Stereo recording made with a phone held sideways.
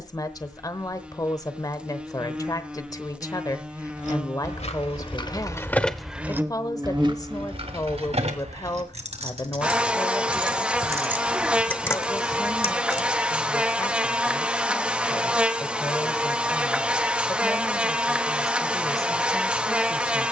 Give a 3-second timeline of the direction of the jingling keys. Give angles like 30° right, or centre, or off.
off, 40° left, 40° right, 30° right, 40° left, off, off.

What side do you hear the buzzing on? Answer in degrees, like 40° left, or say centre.
10° right.